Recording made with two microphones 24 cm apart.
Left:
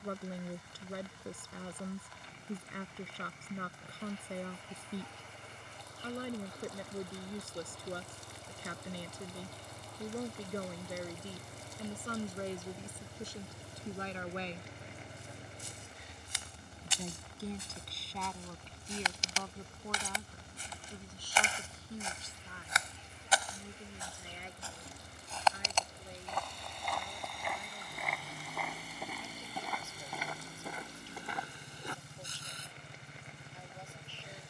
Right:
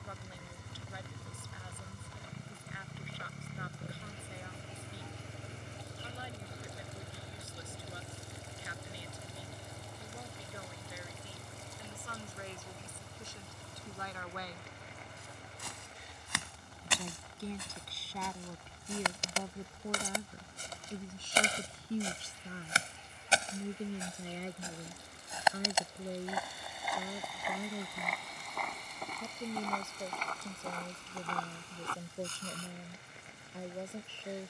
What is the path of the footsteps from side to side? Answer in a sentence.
You can hear the footsteps move from right to left.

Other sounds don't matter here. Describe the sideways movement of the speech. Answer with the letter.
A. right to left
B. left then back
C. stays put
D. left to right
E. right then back
D.